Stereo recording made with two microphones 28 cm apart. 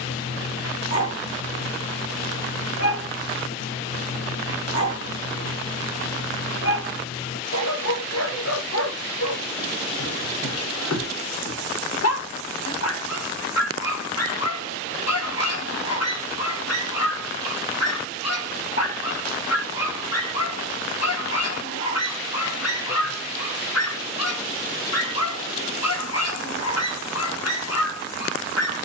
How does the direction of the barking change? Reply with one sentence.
In this clip you hear the barking stay put.